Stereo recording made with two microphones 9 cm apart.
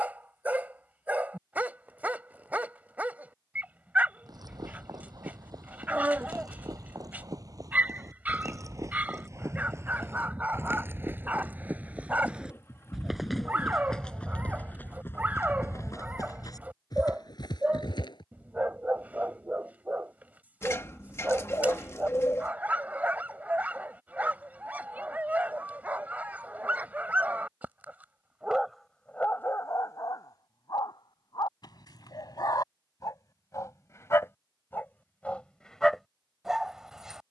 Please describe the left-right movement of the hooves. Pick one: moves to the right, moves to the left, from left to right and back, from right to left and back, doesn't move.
moves to the left.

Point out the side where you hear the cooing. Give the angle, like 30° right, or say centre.
30° left.